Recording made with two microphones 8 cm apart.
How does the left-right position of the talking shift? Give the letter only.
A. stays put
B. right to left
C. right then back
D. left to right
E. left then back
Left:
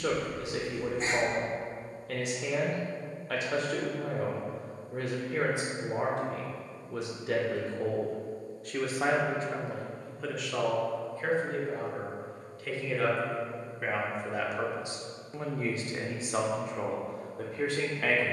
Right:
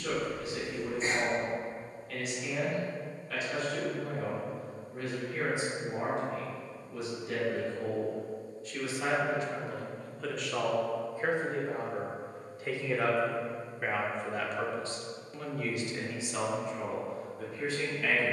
C.